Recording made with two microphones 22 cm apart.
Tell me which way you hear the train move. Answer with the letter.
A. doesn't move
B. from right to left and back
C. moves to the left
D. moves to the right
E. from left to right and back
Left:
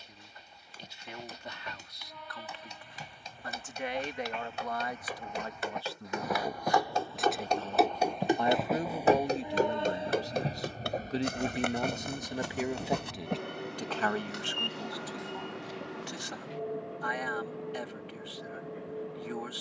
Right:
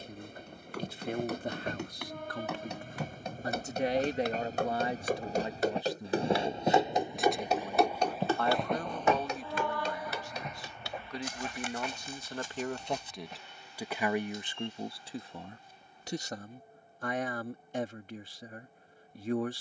C.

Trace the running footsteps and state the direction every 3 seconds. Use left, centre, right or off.
right, right, centre, left, left, off, off.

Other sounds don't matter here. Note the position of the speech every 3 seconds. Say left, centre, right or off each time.
right, right, centre, left, centre, right, right.